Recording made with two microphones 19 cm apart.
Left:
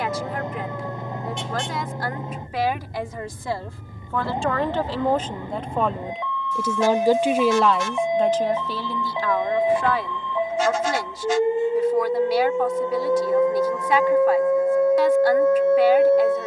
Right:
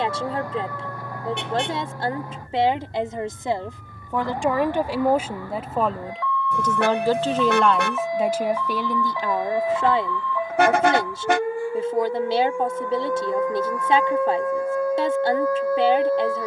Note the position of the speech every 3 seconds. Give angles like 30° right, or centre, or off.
30° right, 10° right, centre, 30° right, 30° right, 30° right.